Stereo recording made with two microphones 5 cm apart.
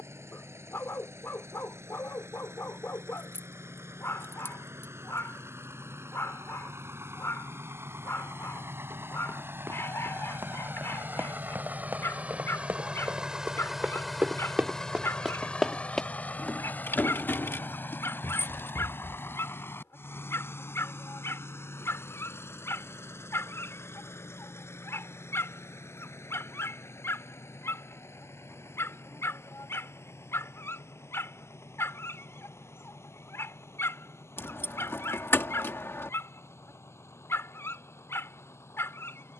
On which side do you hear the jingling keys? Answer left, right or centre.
left.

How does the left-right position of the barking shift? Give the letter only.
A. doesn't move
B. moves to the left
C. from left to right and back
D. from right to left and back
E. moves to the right
A.